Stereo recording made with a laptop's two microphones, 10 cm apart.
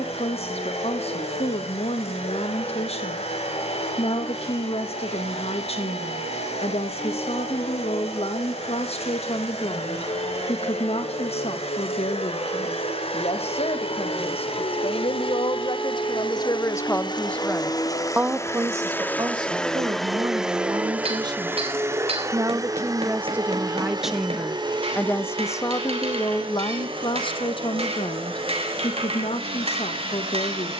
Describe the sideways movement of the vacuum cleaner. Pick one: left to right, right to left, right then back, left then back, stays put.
left to right.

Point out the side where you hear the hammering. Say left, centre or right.
right.